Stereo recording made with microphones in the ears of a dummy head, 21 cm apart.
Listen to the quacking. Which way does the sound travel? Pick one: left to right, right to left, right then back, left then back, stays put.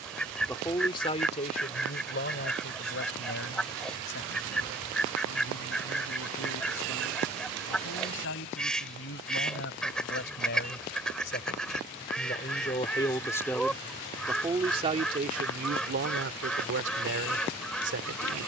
stays put.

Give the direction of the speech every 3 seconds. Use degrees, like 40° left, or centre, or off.
30° left, 60° left, 60° left, 50° left, 10° left, 50° right.